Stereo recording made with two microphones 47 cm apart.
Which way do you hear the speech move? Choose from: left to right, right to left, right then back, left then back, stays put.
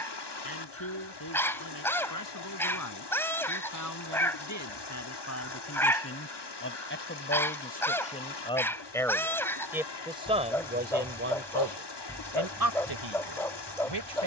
left to right.